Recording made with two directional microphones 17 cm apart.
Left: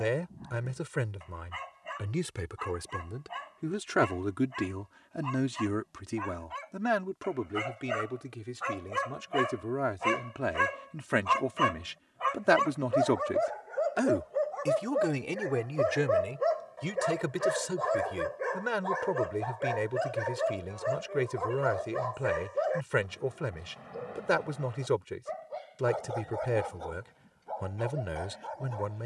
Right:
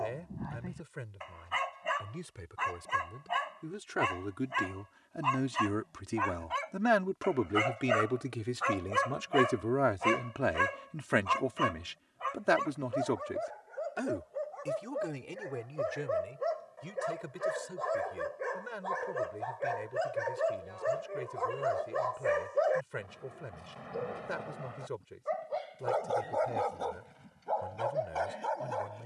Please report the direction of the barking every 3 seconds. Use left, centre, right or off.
right, right, right, centre, left, left, centre, centre, right, right.